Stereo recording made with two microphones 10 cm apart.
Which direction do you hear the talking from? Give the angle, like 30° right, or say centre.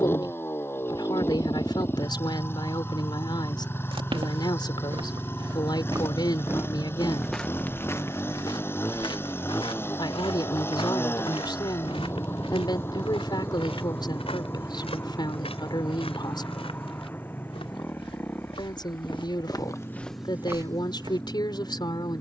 50° left.